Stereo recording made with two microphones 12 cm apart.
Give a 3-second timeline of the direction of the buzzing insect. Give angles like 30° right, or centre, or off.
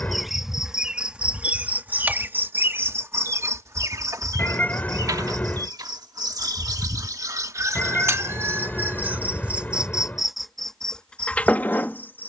10° right, 30° right, 30° right, centre.